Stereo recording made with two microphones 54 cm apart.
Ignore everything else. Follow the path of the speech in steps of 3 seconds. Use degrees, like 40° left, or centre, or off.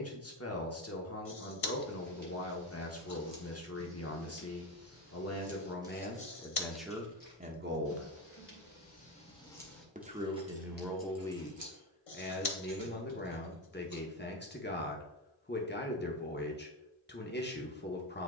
30° left, 30° left, 10° right, centre, 20° left, 20° left.